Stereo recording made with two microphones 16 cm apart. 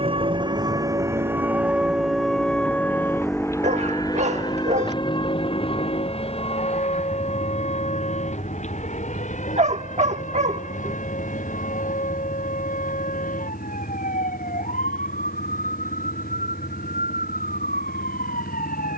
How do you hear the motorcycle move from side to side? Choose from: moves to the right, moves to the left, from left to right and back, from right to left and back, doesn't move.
moves to the left.